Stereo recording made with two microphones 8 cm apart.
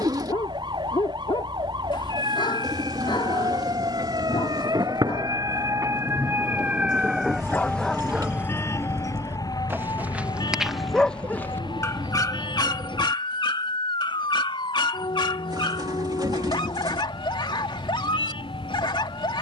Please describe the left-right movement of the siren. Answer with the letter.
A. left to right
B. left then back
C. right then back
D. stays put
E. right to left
E.